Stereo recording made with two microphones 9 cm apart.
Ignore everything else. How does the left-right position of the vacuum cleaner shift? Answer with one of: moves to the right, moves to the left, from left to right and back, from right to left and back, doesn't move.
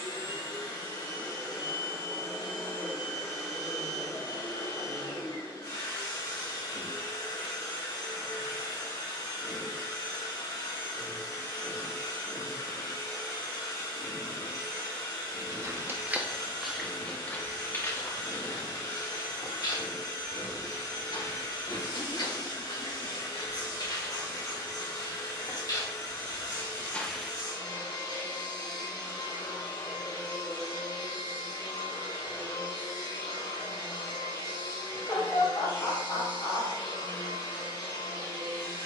doesn't move.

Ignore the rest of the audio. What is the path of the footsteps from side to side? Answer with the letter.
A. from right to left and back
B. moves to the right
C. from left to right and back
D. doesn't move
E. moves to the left
A.